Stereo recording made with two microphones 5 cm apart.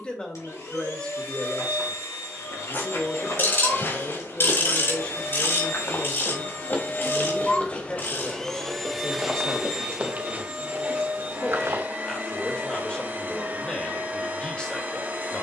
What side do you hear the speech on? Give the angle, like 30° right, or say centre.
20° left.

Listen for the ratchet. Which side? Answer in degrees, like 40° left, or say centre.
50° left.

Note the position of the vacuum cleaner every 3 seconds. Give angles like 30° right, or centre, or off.
80° left, 70° left, 30° left, 20° right, 40° right.